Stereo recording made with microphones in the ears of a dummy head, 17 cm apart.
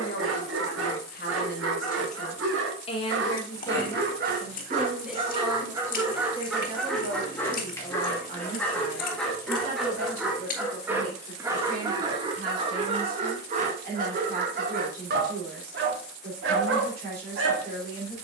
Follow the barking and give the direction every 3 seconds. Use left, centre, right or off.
right, right, centre, centre, right, right.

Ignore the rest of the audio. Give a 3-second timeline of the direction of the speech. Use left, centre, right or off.
left, centre, right, right, right, right.